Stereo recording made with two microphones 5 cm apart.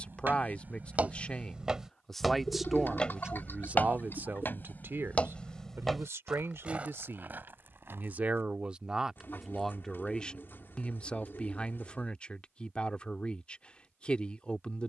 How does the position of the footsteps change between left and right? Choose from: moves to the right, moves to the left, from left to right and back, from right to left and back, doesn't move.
from right to left and back.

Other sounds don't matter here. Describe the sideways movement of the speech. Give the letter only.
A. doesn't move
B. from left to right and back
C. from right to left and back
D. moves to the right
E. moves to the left
B.